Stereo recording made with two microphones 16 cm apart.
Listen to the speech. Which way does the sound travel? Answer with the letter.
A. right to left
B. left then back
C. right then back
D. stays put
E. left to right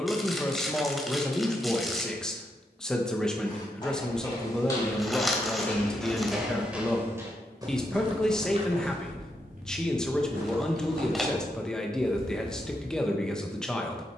D.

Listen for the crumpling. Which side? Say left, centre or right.
centre.